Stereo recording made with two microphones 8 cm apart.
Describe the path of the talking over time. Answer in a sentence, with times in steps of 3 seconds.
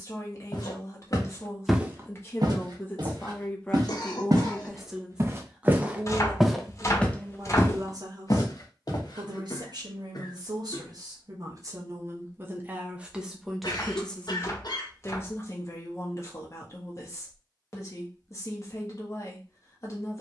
In this clip you hear the talking on the left from 0 s, in the centre from 3 s, on the right from 6 s, in the centre from 12 s and on the left from 15 s.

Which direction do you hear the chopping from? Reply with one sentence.
In this clip you hear the chopping on the left.